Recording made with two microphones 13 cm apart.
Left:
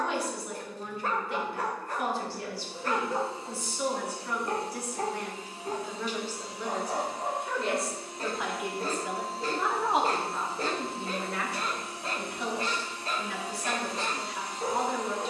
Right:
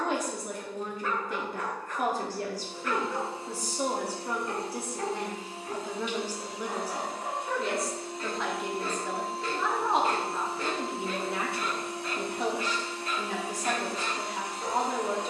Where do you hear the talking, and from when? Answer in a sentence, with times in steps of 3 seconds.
You can hear the talking on the right from 0 s, in the centre from 6 s and on the right from 12 s.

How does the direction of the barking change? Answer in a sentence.
In this clip you hear the barking stay put.